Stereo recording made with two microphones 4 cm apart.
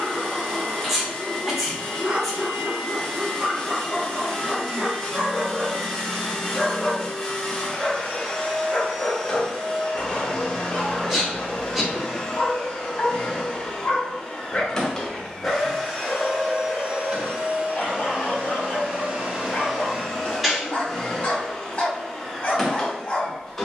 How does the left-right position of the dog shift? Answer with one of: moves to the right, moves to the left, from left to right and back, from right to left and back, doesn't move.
moves to the left.